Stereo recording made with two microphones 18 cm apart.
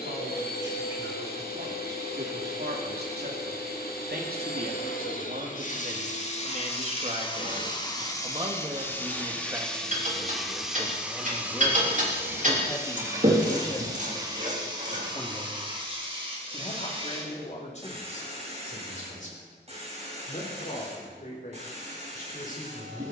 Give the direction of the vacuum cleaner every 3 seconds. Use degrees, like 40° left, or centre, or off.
60° left, 50° left, 30° left, centre, 20° right, 30° right, 30° right, 40° right.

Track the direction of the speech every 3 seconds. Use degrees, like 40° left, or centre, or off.
70° right, 60° right, 30° right, 10° right, 20° left, 30° left, 40° left, 50° left.